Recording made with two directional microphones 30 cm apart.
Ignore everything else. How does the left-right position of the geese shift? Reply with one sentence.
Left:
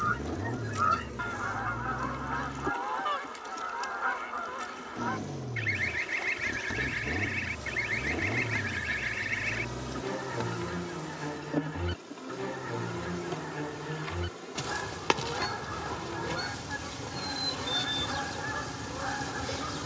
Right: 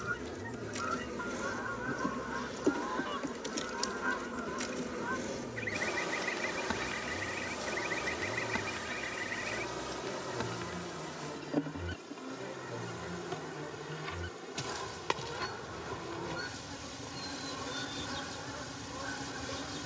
You can hear the geese stay put.